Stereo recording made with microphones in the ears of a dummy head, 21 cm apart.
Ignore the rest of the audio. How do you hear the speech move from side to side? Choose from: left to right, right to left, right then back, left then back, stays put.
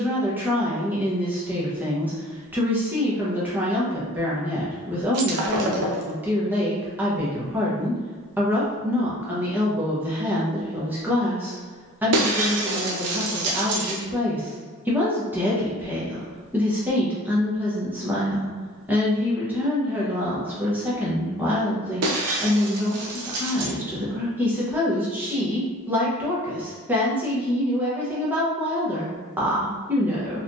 stays put.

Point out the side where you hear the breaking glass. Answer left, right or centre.
right.